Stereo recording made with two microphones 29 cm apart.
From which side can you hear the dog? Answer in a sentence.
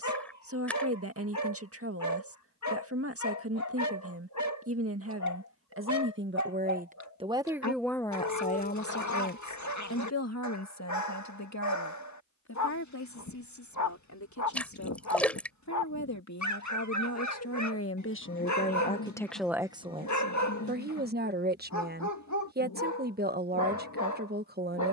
You can hear the dog on the left.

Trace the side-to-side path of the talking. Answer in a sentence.
You can hear the talking move from right to left and back again.